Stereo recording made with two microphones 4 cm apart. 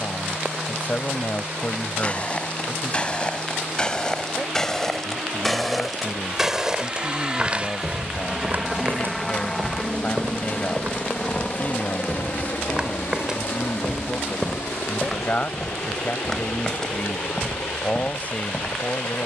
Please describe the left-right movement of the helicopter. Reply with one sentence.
In this clip you hear the helicopter move to the left.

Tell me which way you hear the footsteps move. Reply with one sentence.
In this clip you hear the footsteps move from left to right and back again.